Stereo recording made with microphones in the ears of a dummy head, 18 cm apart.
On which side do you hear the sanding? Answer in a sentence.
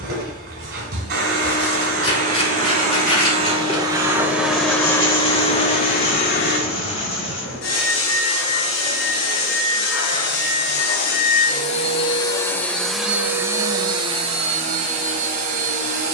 You can hear the sanding on the left.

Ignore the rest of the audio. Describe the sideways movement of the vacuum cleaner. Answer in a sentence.
In this clip you hear the vacuum cleaner move from right to left and back again.